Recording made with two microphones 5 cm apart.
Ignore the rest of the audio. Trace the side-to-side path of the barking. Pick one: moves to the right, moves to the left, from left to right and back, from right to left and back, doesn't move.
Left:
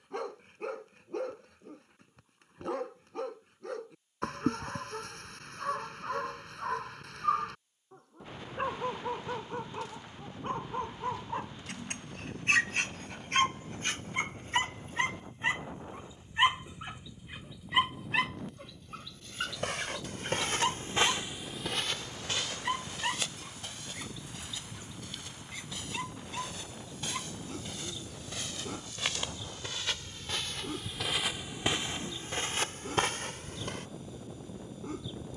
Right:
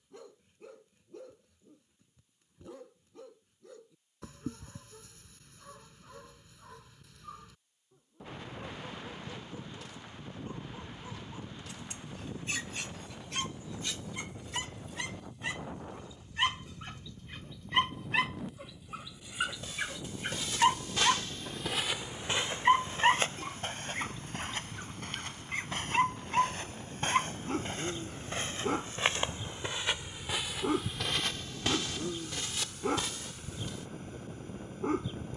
moves to the right.